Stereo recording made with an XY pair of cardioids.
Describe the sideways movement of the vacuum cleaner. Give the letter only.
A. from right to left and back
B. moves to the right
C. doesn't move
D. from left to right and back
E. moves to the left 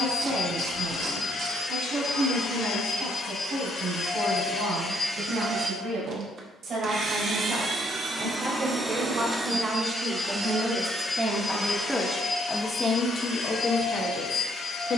D.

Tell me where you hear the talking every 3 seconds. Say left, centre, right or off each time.
right, right, right, right, left.